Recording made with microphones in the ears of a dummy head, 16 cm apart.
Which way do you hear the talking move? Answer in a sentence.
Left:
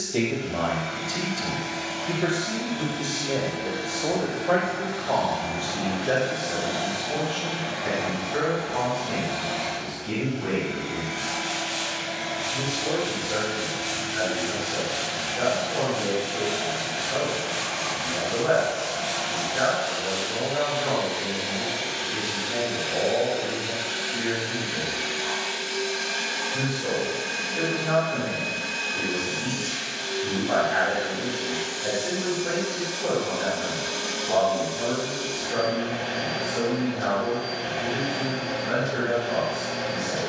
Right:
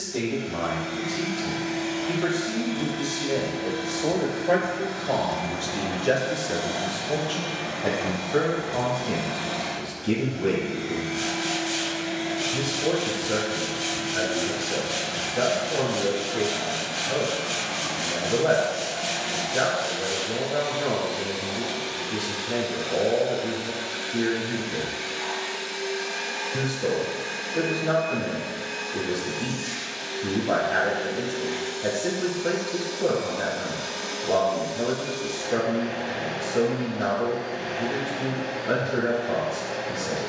In this clip you hear the talking move to the right.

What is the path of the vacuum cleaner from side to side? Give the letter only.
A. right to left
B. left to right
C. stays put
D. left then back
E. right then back
A.